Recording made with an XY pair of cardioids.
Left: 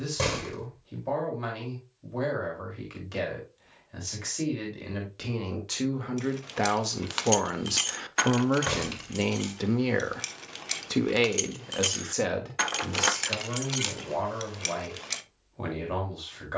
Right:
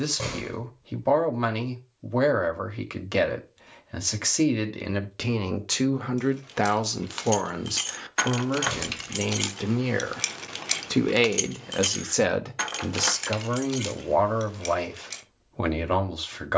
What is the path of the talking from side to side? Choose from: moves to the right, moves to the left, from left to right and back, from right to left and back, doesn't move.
from right to left and back.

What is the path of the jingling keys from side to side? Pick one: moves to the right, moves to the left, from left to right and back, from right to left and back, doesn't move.
from left to right and back.